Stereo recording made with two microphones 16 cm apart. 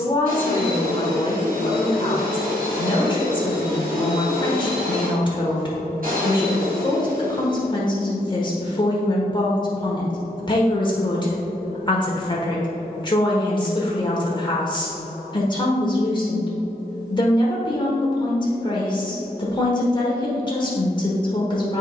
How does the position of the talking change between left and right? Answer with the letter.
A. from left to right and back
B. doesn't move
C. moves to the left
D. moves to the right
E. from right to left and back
B.